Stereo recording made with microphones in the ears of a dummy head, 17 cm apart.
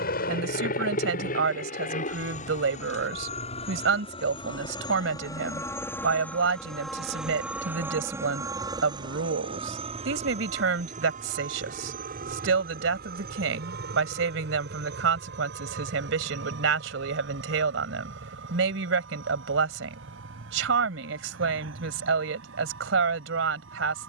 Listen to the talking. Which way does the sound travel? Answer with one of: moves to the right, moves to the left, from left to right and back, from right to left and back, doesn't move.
doesn't move.